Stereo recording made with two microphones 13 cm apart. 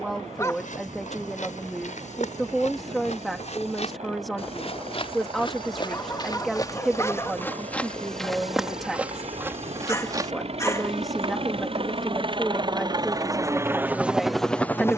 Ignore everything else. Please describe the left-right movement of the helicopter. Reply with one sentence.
You can hear the helicopter travel towards the left.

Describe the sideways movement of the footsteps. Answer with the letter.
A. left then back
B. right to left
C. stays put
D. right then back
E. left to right
E.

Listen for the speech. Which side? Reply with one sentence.
In this clip you hear the speech in the centre.